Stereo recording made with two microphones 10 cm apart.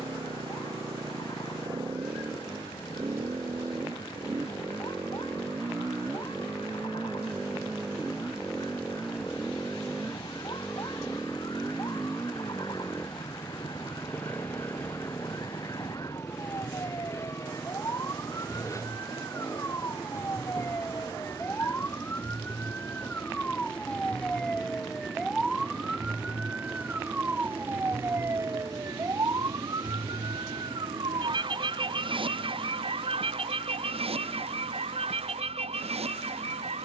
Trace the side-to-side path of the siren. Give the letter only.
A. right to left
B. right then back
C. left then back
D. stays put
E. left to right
E.